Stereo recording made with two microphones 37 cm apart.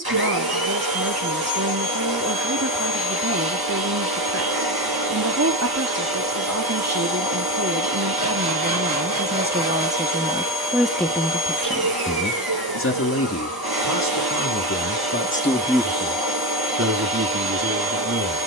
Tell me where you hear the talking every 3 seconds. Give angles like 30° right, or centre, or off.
40° right, 40° right, 40° right, 10° right, 40° left, 20° right.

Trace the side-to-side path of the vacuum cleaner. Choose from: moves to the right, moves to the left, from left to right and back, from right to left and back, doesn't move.
doesn't move.